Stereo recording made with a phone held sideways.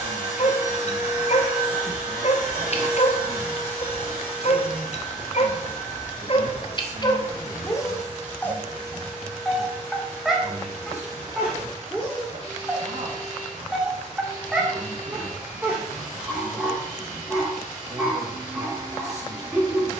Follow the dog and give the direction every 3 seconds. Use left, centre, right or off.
left, left, left, centre, centre, centre, centre.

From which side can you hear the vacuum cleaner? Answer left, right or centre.
right.